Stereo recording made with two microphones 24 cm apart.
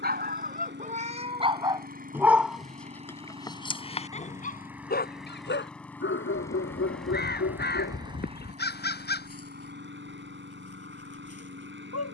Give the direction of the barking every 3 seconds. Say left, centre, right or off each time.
right, left, left, left.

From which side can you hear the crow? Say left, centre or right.
left.